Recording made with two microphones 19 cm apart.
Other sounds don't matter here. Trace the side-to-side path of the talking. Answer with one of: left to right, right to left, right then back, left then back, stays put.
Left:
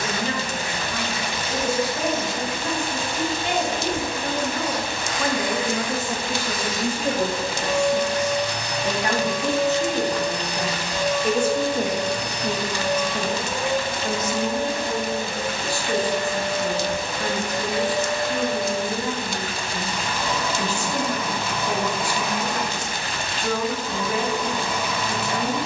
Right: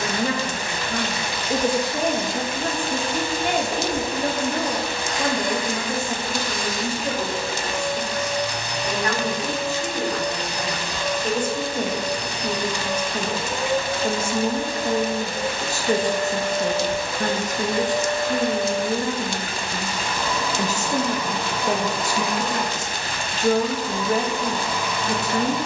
left then back.